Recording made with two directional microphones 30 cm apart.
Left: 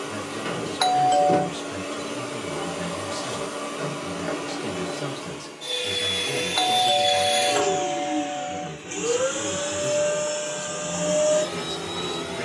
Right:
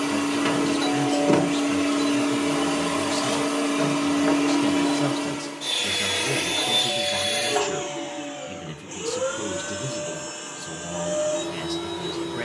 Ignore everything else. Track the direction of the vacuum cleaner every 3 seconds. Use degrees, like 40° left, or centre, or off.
40° right, 40° right, 10° left, 50° left.